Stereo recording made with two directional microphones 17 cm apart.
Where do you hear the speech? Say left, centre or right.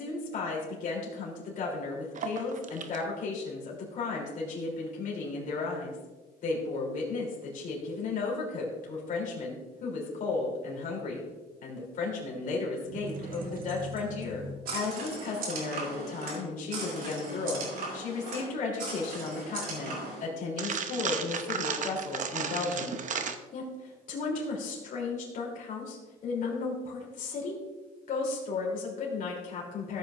left.